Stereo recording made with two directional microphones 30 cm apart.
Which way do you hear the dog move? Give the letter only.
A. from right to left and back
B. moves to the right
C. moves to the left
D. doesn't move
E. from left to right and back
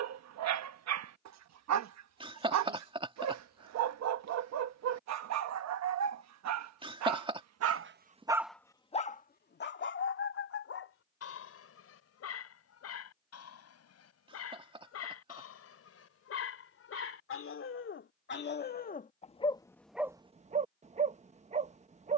A.